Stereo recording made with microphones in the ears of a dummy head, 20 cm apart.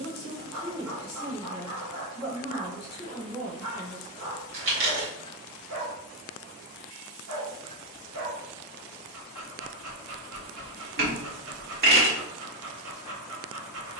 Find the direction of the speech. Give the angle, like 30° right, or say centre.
30° left.